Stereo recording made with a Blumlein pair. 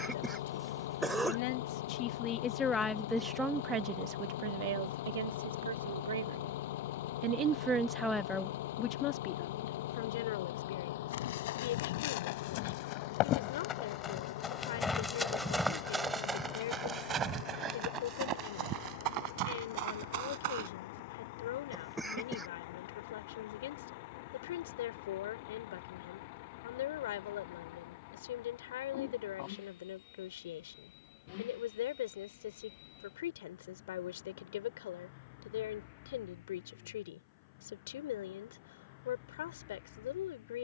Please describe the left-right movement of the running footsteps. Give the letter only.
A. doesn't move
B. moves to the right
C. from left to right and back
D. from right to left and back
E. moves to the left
B.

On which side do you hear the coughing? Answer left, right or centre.
centre.